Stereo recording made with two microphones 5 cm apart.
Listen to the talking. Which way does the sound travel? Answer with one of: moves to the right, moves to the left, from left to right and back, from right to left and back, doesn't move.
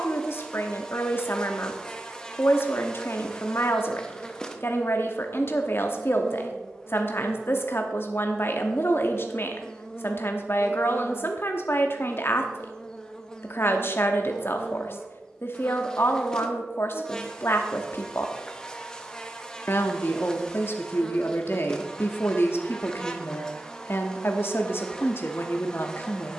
doesn't move.